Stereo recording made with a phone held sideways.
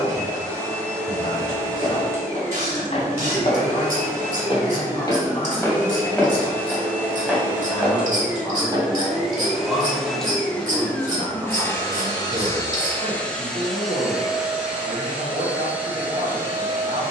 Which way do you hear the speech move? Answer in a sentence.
In this clip you hear the speech go from the left side to the right.